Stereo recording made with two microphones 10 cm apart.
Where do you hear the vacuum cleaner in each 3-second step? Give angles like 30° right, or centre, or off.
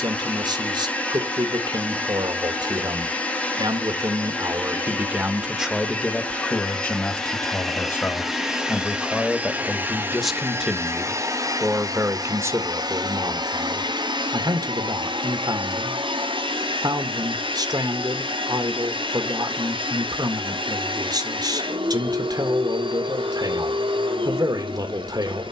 10° left, 10° left, centre, 30° right, 50° right, 70° right, 70° right, 70° right, 70° right.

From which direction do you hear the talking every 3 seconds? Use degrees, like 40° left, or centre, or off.
50° right, 30° right, 20° left, centre, 40° right, 50° right, 50° right, 50° right, 50° right.